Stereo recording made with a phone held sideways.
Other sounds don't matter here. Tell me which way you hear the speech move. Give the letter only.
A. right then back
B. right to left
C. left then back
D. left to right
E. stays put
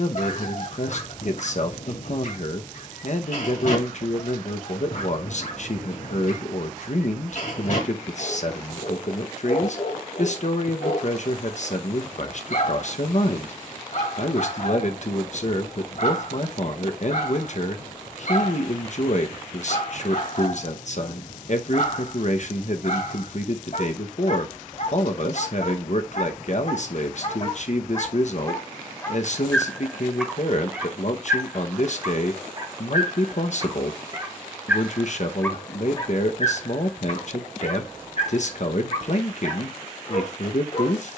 E.